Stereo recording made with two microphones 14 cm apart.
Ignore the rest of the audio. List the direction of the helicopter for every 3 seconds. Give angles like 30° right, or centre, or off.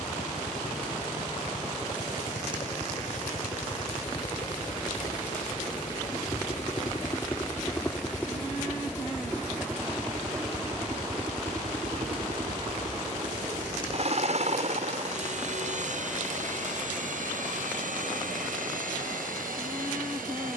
50° left, 40° left, 20° left, 20° right, 40° right, 60° right, 70° right.